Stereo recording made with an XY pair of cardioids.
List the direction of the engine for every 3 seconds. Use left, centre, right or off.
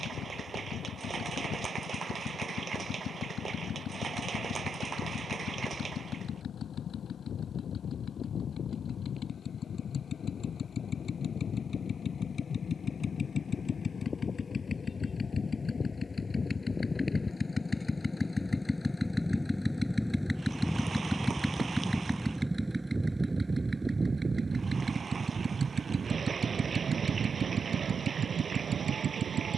left, left, left, left, left, left, centre, centre, right, right.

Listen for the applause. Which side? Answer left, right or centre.
right.